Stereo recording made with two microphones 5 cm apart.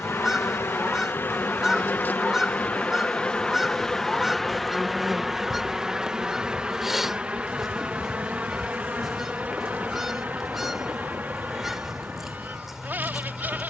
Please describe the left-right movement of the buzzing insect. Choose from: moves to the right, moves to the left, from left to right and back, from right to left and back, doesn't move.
moves to the right.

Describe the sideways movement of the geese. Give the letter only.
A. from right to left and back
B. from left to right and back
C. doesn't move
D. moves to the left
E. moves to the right
C.